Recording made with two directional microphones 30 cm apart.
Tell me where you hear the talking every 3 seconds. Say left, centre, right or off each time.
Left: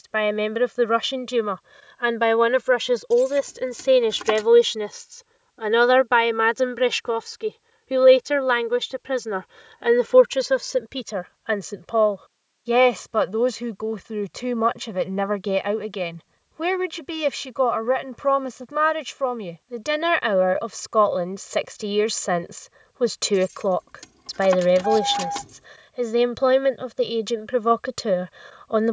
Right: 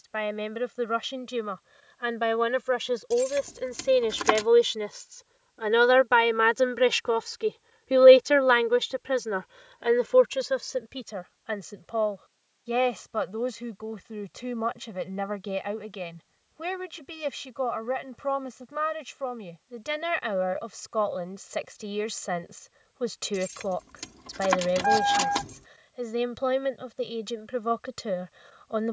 left, left, centre, left, left, left, left, left, left, left.